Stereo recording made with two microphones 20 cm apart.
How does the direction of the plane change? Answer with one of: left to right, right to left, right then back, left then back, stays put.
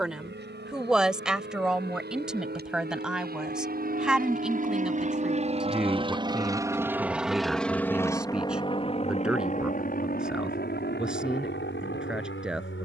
right to left.